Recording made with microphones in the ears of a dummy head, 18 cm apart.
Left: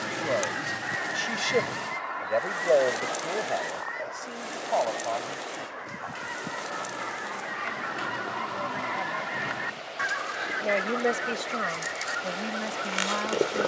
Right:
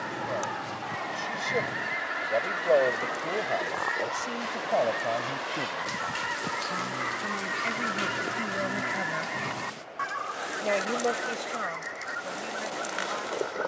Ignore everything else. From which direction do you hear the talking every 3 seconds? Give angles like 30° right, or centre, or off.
30° left, 20° right, 50° right, 10° left, 60° left.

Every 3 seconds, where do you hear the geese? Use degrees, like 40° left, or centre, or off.
centre, 70° right, 40° right, 30° left, 40° left.